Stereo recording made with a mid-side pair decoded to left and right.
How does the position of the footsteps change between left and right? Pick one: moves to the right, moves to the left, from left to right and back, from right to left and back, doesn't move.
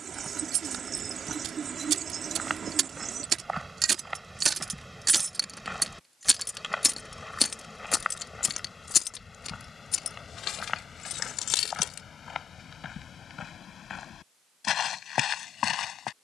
moves to the left.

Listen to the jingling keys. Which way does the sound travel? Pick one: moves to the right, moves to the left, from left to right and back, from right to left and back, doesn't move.
moves to the left.